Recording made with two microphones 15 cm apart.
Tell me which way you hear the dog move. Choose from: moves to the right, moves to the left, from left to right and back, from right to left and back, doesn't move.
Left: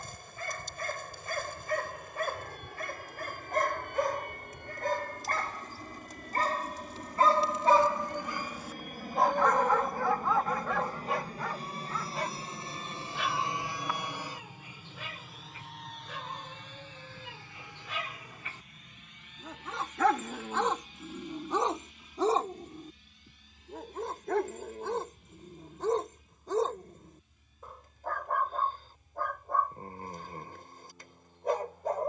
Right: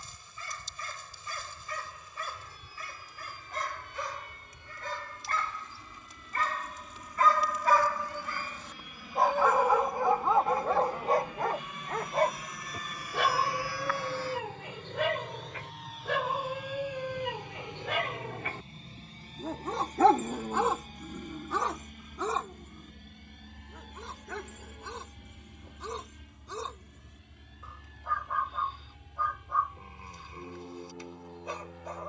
from left to right and back.